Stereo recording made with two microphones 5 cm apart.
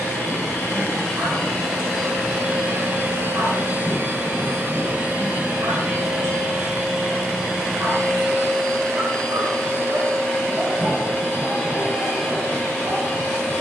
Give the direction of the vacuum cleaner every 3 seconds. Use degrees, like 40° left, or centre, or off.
centre, 30° right, centre, 10° left, 20° left.